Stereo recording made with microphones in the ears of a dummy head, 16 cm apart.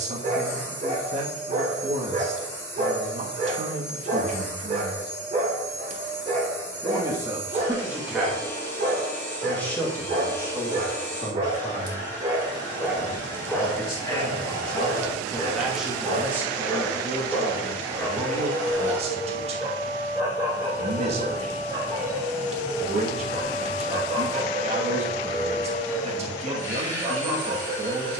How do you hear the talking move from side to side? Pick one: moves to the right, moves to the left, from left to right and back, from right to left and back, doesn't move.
from right to left and back.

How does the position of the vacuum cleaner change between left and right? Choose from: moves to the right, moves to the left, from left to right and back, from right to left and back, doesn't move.
doesn't move.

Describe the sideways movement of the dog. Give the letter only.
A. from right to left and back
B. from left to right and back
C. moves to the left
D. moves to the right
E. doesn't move
A.